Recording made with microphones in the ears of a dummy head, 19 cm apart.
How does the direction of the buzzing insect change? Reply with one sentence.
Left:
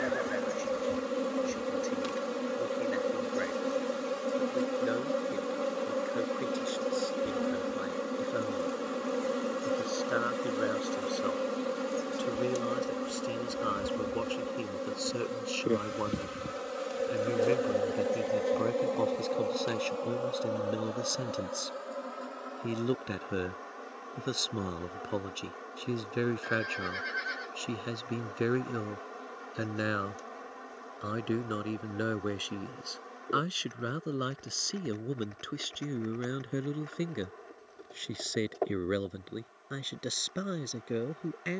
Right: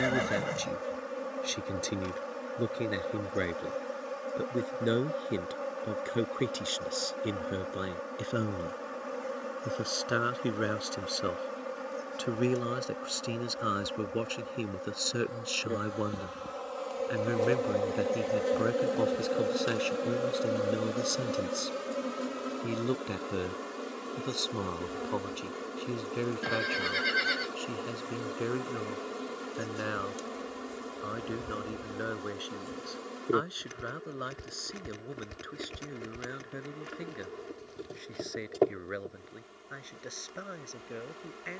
You can hear the buzzing insect move to the right.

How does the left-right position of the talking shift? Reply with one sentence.
In this clip you hear the talking move to the left.